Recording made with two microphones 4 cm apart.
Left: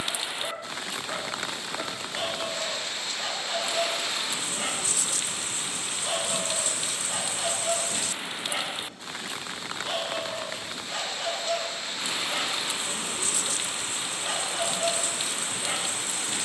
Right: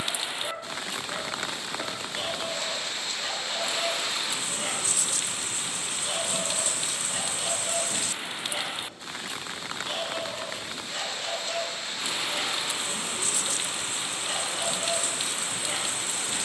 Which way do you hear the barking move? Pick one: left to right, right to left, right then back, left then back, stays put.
stays put.